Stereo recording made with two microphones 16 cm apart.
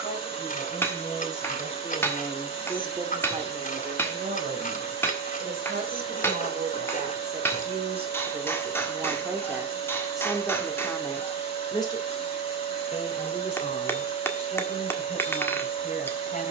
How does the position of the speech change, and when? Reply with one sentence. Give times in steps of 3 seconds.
In this clip you hear the speech on the left from 0 s, on the right from 3 s, in the centre from 9 s and on the left from 12 s.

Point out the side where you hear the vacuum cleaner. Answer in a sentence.
You can hear the vacuum cleaner on the left.